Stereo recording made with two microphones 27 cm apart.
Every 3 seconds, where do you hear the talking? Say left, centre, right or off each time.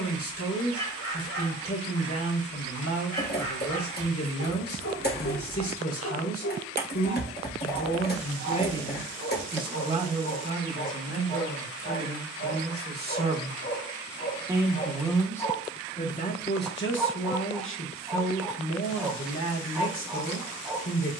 left, left, left, right, right, left, left.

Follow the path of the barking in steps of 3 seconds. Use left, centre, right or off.
left, left, left, left, left, centre, centre.